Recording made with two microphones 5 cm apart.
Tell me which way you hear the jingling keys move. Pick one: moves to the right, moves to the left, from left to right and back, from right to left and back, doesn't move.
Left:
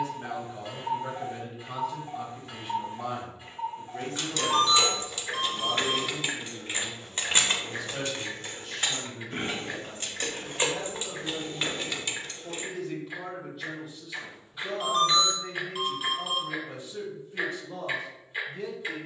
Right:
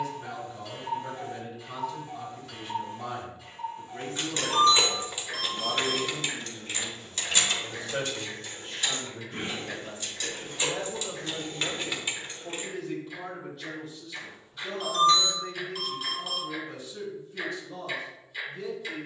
from right to left and back.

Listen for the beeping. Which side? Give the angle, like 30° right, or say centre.
20° left.